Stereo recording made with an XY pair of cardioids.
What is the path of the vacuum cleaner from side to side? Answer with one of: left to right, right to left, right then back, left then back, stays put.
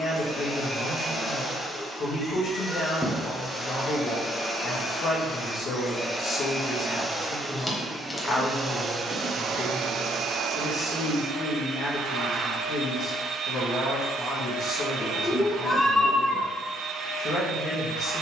left to right.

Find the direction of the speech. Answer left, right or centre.
left.